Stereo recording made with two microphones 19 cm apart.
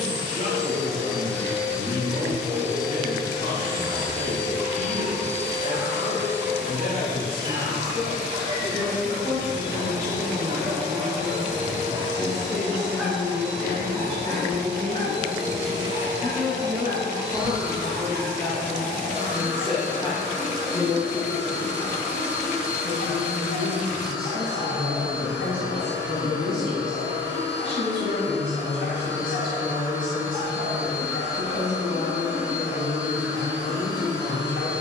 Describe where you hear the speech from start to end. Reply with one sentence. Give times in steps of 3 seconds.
In this clip you hear the speech on the left from 0 s, in the centre from 15 s and on the left from 18 s.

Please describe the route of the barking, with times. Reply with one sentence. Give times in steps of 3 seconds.
You can hear the barking on the right from 0 s, in the centre from 12 s and on the left from 15 s.